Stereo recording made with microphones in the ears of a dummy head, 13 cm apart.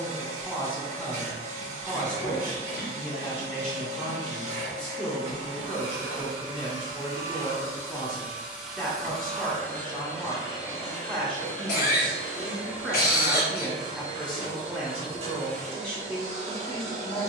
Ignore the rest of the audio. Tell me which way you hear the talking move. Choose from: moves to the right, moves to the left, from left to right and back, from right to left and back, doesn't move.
doesn't move.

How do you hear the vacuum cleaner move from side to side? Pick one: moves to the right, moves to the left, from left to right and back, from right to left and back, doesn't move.
from right to left and back.